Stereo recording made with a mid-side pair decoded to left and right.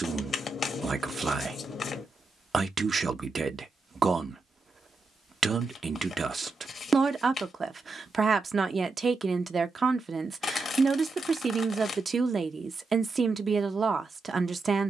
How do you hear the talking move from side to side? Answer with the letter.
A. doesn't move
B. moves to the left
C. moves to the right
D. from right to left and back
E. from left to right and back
A.